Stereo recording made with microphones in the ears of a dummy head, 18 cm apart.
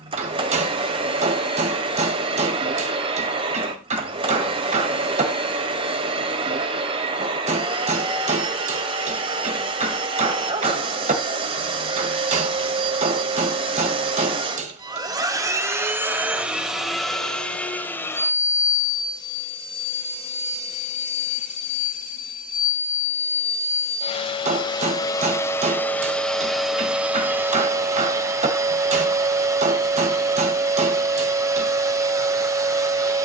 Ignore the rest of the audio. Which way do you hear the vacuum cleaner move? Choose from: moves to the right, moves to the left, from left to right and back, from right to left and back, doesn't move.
from right to left and back.